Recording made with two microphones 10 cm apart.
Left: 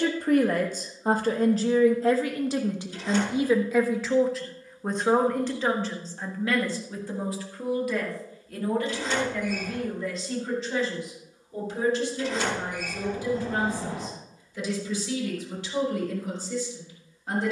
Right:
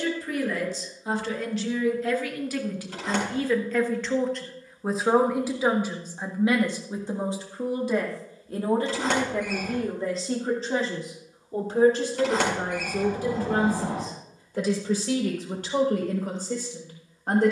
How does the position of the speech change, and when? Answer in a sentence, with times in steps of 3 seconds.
In this clip you hear the speech on the left from 0 s, in the centre from 3 s and on the right from 6 s.